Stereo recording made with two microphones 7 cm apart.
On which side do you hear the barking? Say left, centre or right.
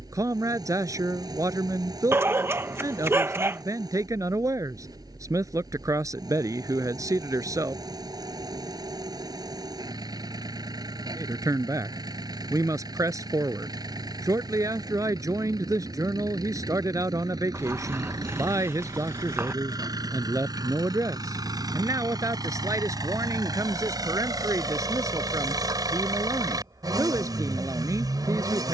right.